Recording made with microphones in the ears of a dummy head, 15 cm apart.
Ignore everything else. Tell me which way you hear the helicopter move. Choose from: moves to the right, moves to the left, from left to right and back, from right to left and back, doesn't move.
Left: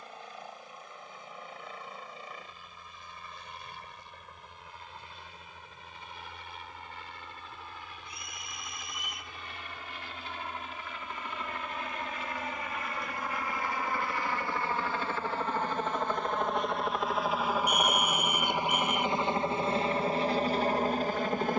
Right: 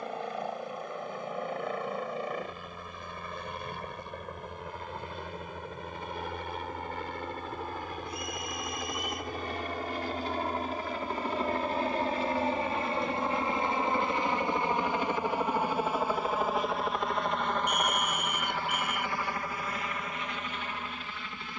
moves to the left.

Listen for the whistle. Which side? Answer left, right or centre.
left.